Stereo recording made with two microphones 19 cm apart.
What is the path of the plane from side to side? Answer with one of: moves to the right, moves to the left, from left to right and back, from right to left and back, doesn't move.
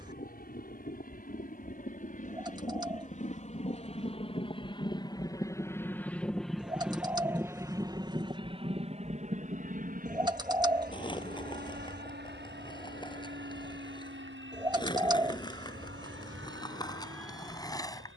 moves to the right.